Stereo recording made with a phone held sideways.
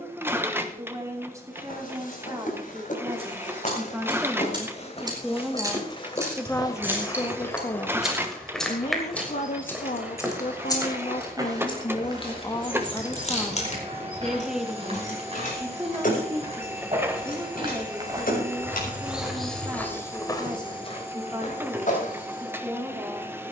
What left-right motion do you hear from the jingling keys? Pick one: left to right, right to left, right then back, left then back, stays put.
right to left.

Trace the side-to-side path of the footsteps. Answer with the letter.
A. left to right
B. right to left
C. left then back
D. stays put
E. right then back
E.